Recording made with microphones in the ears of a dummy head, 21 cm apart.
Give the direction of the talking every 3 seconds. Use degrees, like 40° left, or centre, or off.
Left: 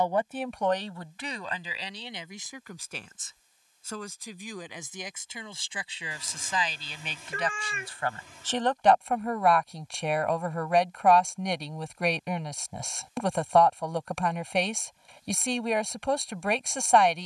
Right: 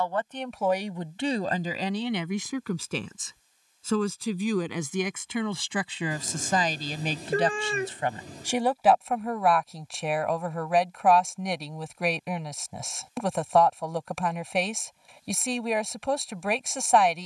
30° right, 60° right, 30° right, centre, centre, centre.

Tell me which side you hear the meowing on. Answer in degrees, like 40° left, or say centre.
30° right.